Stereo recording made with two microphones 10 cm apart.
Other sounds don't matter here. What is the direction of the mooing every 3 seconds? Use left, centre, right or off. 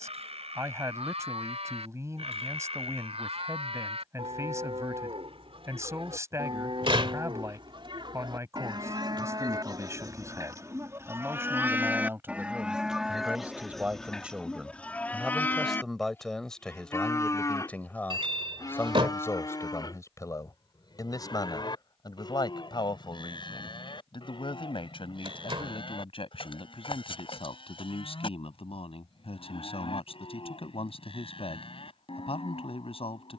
right, right, right, right, centre, left, left, left, left, left, left.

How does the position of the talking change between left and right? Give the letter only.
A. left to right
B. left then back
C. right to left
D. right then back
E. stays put
C.